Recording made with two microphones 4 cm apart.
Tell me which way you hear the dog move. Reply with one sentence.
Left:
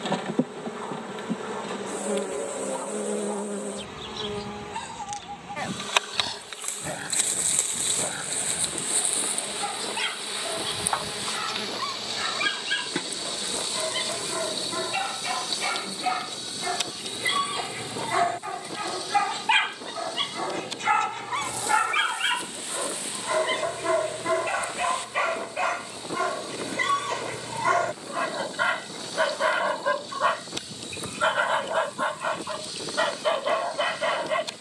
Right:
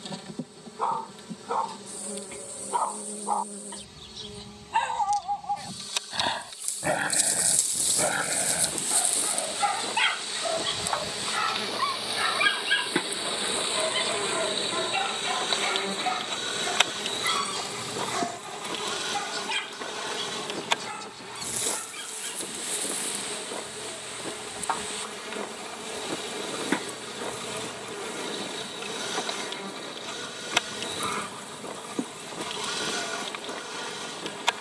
In this clip you hear the dog move from right to left.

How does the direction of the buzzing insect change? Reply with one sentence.
In this clip you hear the buzzing insect move from left to right.